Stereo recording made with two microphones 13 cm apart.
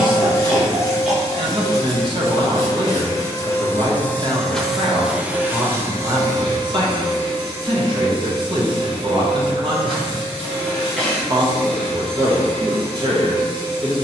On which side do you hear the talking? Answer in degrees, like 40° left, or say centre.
40° right.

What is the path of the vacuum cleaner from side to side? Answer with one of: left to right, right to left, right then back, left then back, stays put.
left to right.